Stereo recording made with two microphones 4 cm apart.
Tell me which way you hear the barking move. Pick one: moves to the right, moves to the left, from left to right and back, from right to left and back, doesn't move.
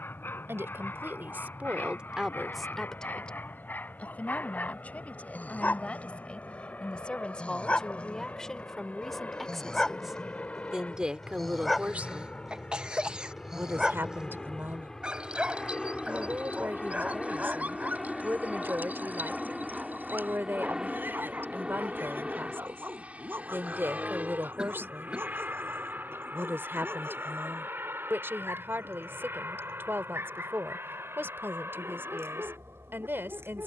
moves to the right.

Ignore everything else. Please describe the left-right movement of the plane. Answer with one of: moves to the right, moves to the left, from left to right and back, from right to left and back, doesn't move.
moves to the right.